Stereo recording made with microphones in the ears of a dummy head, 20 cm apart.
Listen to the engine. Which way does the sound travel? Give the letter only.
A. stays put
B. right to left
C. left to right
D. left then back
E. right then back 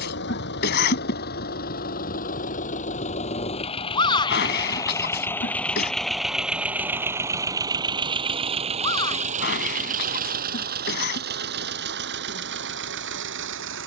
C.